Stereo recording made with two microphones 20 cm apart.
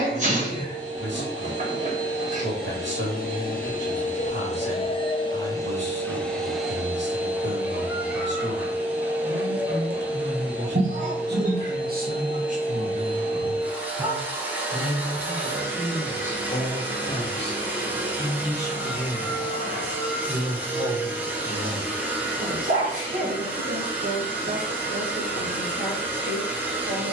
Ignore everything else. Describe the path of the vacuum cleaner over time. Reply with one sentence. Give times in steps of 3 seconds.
You can hear the vacuum cleaner on the left from 0 s and in the centre from 6 s.